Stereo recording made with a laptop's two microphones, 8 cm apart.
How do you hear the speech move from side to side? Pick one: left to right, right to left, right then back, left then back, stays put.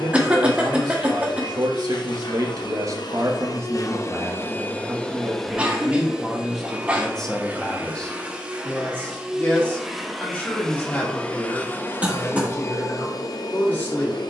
right to left.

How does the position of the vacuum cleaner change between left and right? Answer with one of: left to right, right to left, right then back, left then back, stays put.
right then back.